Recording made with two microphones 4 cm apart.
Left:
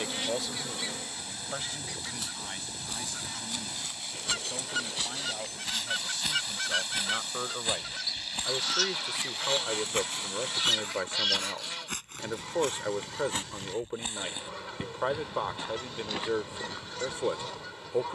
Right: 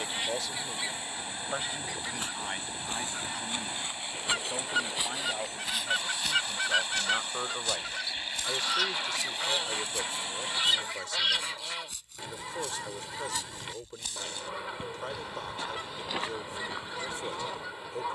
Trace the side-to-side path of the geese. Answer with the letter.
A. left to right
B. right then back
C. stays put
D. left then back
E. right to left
C.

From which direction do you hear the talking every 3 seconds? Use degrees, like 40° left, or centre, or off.
20° right, 20° right, centre, 30° left, 30° left, 30° left.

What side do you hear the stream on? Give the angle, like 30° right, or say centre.
30° right.